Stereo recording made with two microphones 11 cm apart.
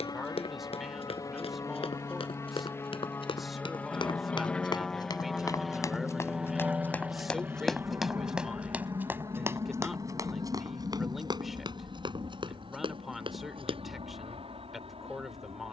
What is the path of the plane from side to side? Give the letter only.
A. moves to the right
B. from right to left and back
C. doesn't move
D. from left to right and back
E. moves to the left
A.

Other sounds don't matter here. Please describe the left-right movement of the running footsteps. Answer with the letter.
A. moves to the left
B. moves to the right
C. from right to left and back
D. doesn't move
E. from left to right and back
B.